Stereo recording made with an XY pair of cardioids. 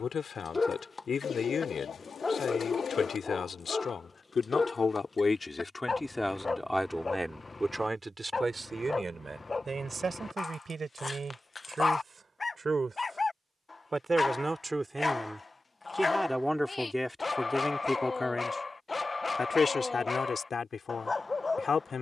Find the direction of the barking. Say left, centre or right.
left.